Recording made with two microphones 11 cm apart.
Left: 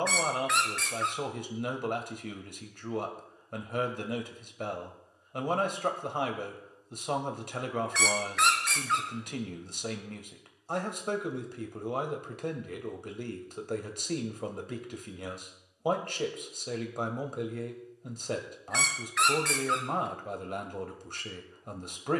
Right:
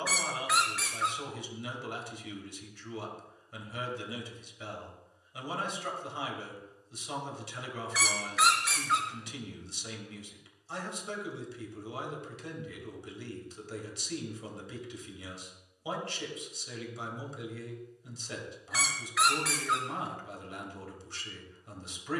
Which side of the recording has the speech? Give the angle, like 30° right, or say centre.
50° left.